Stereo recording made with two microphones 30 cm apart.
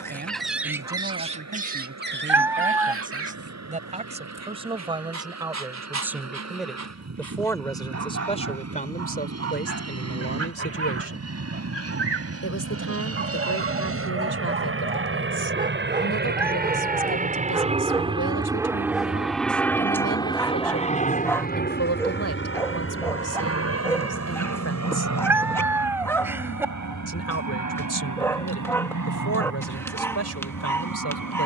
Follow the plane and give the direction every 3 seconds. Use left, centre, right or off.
right, right, right, right, right, right, centre, left, left, left, left.